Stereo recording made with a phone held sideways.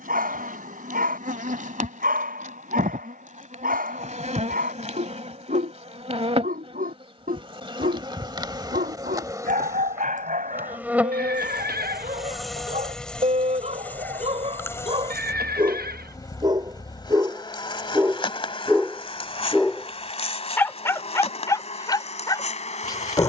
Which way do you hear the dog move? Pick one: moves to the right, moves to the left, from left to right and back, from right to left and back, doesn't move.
moves to the left.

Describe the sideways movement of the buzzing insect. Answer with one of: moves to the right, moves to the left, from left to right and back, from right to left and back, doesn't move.
moves to the left.